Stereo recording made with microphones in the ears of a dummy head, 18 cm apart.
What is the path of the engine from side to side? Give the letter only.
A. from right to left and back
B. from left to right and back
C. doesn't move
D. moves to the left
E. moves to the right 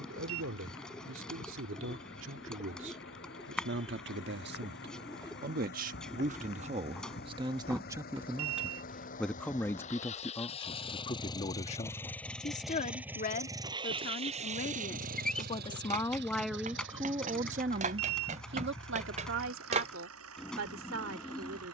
E.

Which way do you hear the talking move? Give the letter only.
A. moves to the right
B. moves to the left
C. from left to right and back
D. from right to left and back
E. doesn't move
D.